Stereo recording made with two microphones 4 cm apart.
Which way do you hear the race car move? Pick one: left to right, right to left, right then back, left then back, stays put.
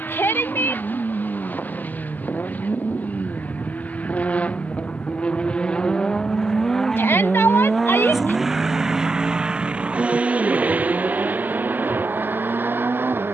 left to right.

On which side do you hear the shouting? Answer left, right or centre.
left.